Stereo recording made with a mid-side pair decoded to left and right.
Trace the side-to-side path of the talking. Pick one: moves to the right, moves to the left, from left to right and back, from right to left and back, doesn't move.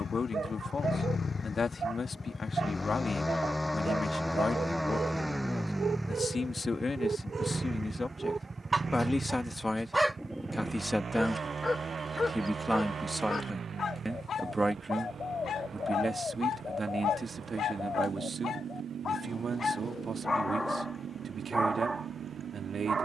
moves to the right.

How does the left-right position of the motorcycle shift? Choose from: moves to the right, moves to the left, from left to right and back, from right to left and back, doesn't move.
moves to the right.